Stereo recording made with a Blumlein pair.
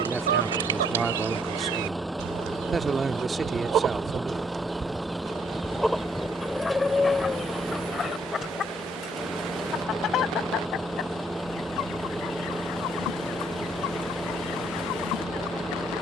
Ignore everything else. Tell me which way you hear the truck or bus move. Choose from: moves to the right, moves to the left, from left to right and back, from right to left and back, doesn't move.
doesn't move.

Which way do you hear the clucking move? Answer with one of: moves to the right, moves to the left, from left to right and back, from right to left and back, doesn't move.
moves to the left.